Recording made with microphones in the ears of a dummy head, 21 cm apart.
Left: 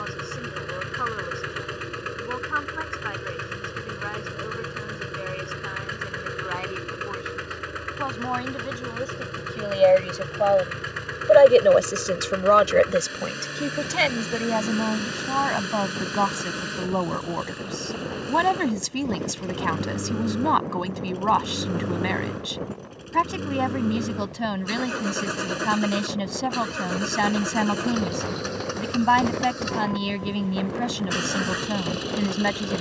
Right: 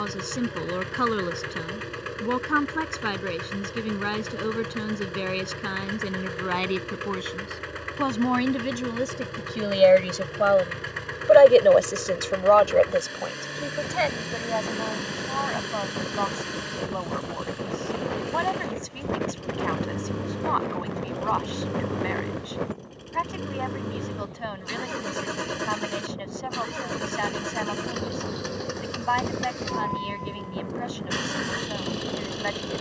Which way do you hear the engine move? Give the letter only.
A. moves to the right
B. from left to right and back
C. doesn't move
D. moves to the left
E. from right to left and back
C.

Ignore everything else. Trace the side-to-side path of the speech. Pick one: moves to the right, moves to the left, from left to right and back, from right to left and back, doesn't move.
moves to the left.